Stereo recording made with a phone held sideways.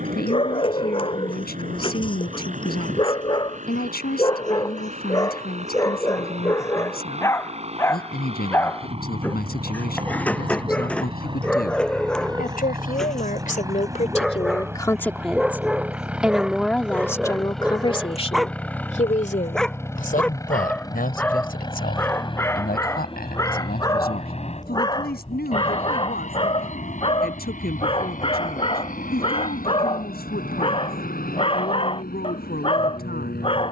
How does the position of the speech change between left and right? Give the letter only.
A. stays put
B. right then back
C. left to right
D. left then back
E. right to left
B.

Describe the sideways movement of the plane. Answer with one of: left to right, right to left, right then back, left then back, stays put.
right to left.